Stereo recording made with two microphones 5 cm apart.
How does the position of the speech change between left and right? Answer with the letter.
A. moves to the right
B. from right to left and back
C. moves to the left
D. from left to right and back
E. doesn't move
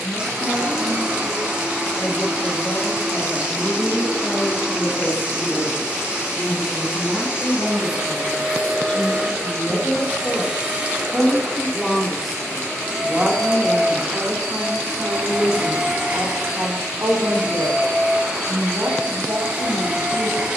A.